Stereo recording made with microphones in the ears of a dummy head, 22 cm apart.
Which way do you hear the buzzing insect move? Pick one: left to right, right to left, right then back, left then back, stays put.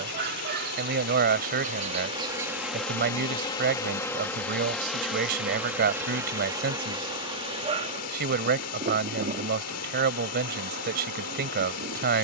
left then back.